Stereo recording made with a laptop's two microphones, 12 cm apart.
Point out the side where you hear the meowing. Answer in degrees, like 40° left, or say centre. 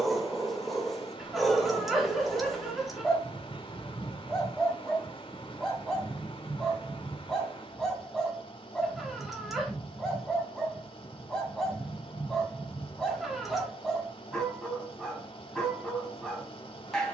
centre.